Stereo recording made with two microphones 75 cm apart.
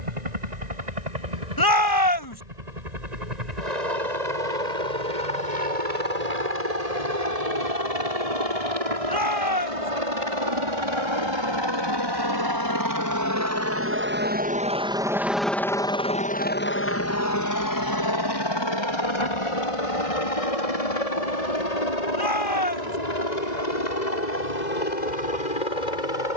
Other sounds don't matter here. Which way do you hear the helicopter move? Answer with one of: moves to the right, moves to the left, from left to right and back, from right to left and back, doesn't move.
moves to the left.